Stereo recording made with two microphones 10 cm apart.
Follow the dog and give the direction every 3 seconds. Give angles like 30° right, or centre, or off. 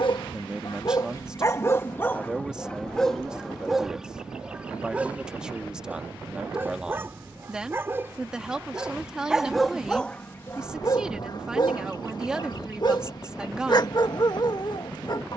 30° left, 10° right, 20° right, 20° left, 50° left.